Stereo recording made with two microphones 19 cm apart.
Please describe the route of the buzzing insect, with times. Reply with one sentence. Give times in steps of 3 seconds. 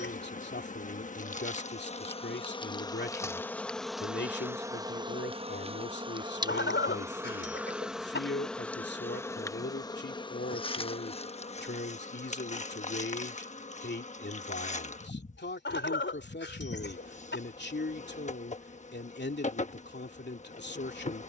You can hear the buzzing insect on the left from 0 s, in the centre from 3 s and on the left from 9 s.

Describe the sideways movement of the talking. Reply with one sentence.
You can hear the talking stay put.